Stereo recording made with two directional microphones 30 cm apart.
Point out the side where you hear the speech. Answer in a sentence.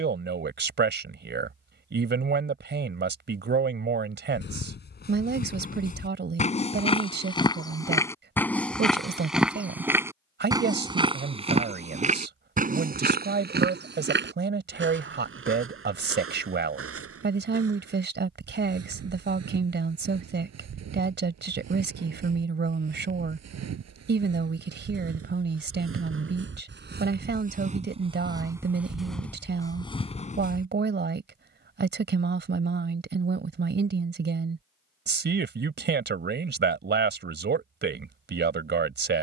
You can hear the speech on the right.